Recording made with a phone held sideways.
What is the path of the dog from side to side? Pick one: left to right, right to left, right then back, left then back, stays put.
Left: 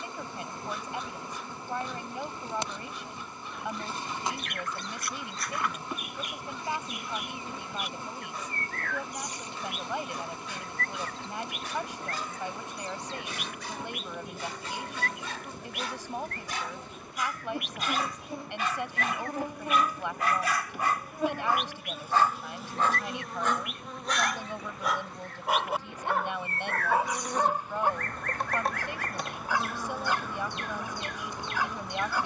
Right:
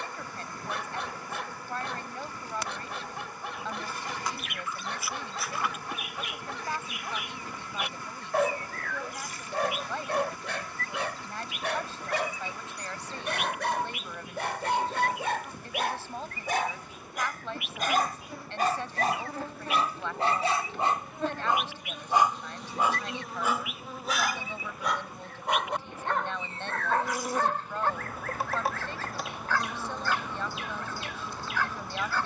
right to left.